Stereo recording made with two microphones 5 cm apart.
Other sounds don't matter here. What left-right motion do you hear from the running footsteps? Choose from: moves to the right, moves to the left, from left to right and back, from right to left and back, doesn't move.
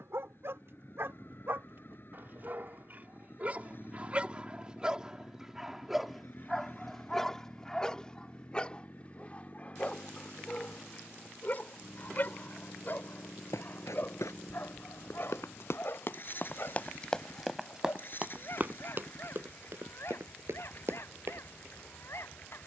moves to the right.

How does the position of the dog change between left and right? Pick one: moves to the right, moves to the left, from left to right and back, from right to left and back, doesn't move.
moves to the left.